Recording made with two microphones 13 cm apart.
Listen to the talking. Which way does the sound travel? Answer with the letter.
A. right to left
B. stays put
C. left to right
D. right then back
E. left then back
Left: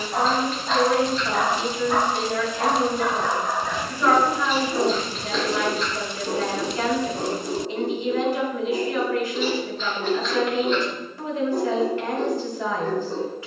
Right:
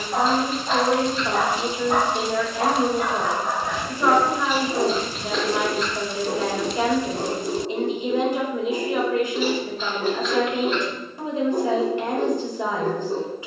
B.